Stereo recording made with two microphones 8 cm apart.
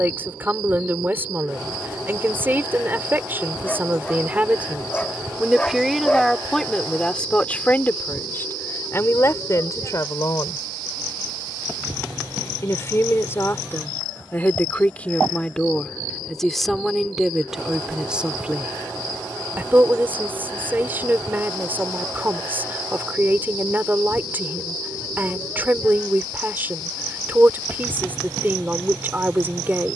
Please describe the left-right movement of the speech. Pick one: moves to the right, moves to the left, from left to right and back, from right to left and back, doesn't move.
from right to left and back.